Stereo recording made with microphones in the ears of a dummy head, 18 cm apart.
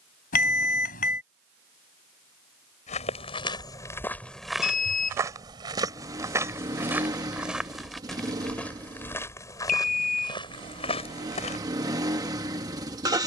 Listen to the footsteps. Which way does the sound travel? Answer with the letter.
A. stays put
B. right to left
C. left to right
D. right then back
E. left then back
D.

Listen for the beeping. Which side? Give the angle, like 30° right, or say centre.
40° left.